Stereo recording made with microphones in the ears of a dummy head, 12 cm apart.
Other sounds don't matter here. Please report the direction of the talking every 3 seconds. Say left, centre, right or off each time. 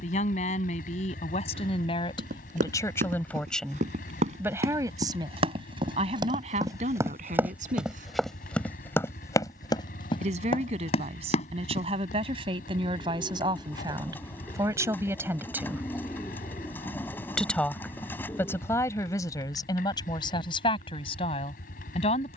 left, centre, right, right, right, centre, left, left.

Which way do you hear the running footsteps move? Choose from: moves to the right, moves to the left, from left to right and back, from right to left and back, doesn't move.
moves to the left.